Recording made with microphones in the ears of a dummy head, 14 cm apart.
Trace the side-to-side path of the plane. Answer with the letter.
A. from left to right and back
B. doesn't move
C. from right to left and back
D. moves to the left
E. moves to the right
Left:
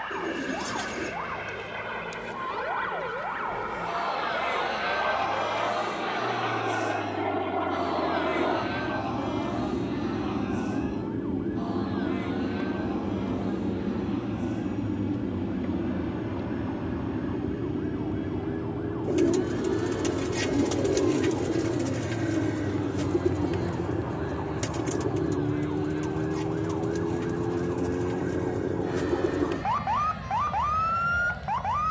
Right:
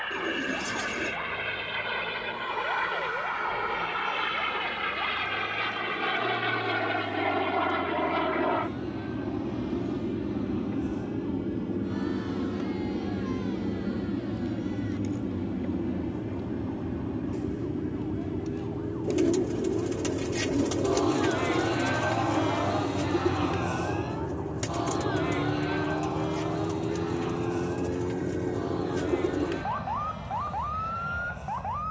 D.